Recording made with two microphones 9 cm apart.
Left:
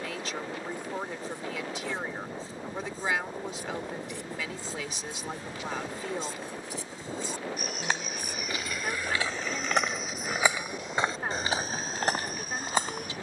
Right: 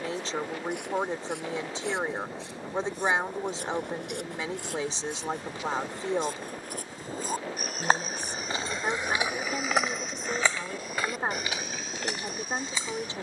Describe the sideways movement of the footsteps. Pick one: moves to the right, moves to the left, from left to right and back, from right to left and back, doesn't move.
moves to the left.